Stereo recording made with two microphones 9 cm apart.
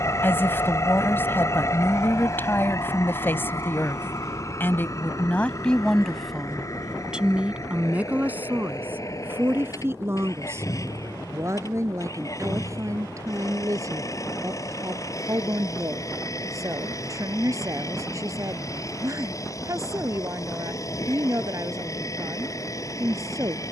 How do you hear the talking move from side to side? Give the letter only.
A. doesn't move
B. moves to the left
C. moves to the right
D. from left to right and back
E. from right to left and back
C.